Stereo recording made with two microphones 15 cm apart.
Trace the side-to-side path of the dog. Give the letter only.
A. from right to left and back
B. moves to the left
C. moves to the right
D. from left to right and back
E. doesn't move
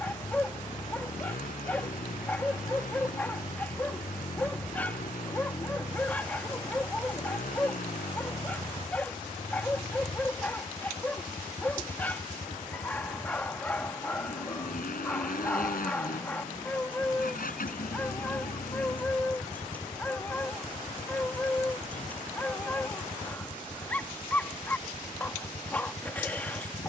E.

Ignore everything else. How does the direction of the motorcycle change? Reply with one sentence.
You can hear the motorcycle stay in one place.